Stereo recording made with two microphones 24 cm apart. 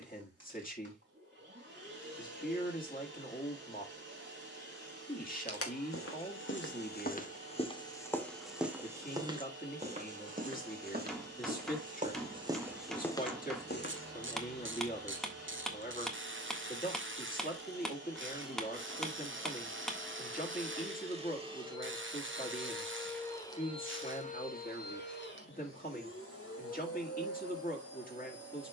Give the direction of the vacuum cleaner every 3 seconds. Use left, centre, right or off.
right, right, right, right, right, right, right, centre, left, left.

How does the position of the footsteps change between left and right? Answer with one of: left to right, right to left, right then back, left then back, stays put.
right then back.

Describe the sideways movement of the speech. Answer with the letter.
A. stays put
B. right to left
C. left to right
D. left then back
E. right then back
A.